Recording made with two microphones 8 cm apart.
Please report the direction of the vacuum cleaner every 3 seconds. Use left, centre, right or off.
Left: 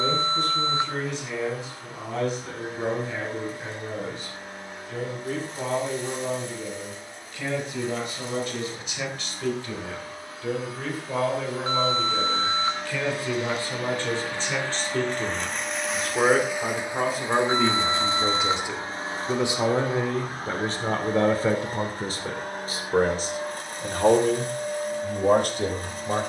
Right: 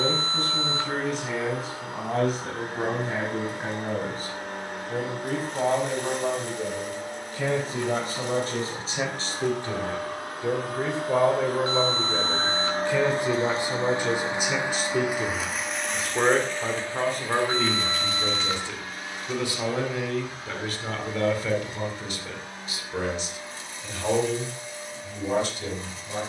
right, right, right, right, right, centre, left, left, left.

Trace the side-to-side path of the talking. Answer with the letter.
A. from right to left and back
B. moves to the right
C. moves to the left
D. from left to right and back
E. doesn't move
C.